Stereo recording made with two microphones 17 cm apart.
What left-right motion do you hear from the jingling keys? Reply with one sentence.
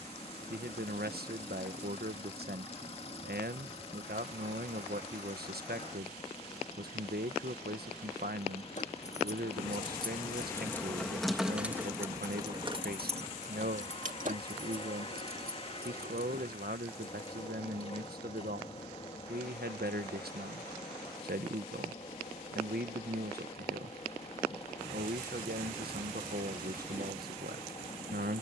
You can hear the jingling keys move to the right.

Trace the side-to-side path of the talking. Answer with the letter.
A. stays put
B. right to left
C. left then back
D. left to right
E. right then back
A.